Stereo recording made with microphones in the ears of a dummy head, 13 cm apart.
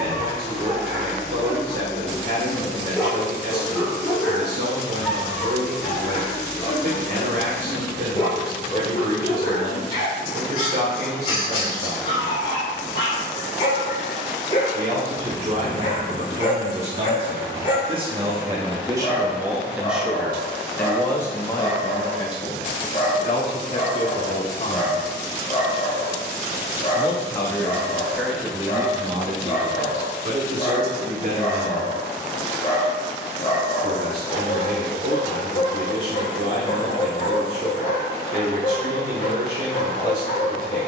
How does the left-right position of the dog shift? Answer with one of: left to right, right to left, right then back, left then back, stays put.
right to left.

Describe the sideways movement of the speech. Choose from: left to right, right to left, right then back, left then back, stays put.
left then back.